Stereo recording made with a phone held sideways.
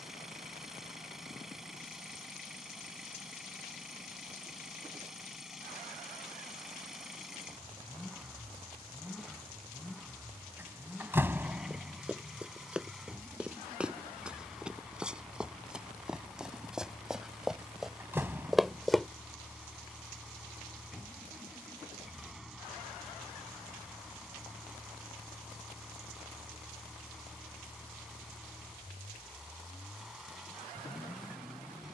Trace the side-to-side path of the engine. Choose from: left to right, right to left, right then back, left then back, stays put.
stays put.